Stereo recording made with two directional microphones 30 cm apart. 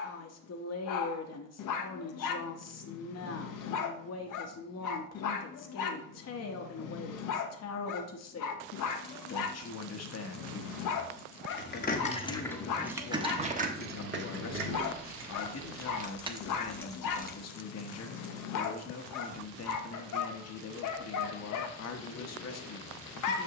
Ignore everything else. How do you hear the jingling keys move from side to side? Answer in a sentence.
You can hear the jingling keys move from left to right and back again.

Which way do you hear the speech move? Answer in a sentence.
In this clip you hear the speech stay in one place.